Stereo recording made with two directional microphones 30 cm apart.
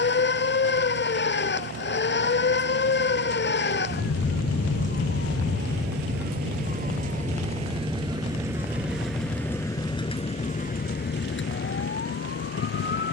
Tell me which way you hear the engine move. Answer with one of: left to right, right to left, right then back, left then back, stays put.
right to left.